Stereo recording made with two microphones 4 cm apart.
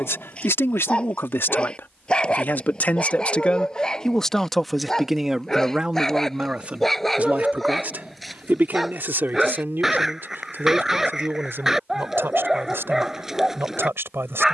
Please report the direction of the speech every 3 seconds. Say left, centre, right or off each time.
left, centre, right, right, right.